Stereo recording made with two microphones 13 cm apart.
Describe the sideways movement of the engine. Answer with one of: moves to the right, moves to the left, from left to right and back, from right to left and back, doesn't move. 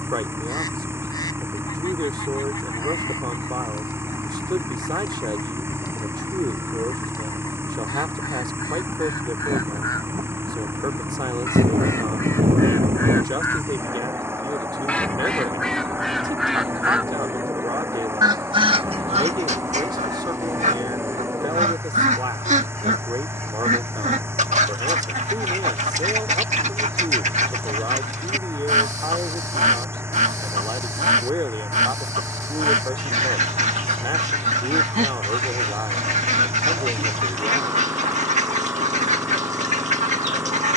doesn't move.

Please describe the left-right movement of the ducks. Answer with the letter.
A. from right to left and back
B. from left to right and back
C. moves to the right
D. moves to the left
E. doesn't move
C.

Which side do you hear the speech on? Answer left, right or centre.
right.